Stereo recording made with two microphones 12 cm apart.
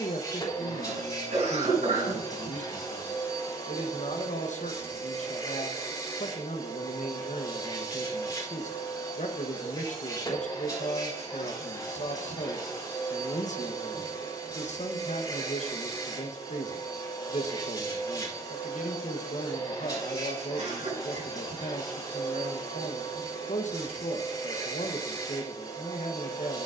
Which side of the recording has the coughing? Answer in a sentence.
In this clip you hear the coughing on the right.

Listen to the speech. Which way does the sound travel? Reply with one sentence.
You can hear the speech stay in one place.